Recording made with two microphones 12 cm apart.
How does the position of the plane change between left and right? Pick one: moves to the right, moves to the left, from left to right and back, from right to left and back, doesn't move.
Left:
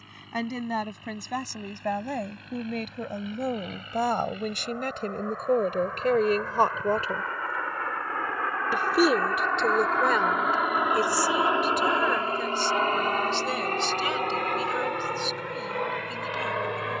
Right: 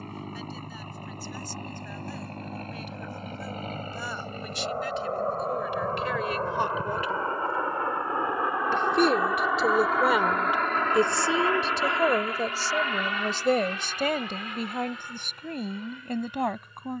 moves to the left.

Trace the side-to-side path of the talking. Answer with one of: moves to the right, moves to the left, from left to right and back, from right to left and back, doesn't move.
moves to the right.